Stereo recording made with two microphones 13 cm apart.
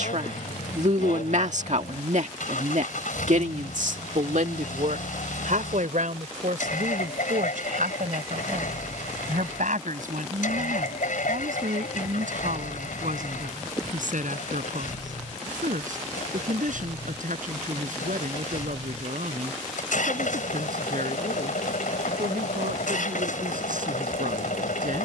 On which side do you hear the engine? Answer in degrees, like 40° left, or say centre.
80° left.